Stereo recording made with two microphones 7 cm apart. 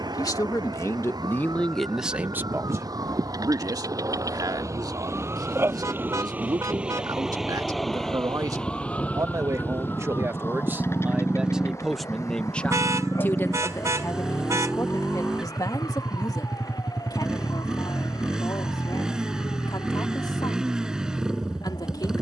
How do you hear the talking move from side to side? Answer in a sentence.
In this clip you hear the talking go right and come back.